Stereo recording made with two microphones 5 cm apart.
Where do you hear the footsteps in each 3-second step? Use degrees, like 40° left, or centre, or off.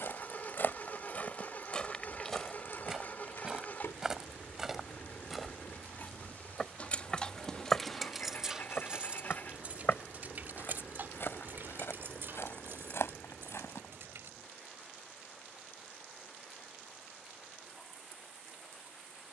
30° left, 10° right, 20° left, 50° left, 70° left, off, off.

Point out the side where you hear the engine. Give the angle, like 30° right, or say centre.
40° left.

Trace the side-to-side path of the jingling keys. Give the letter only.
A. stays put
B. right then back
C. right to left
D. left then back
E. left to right
E.